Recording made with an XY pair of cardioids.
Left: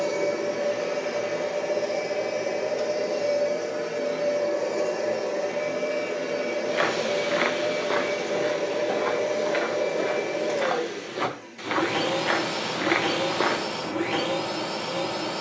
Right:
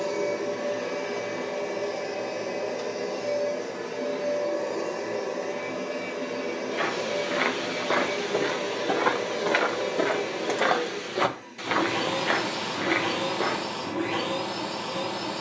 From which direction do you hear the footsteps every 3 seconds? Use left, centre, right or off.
off, off, centre, right, left.